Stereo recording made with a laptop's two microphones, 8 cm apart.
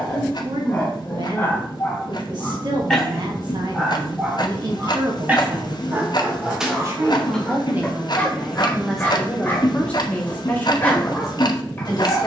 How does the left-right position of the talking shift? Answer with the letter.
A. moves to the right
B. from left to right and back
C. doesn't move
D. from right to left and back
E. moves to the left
E.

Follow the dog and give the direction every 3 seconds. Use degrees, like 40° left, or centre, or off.
20° left, 10° right, 10° left, 20° left.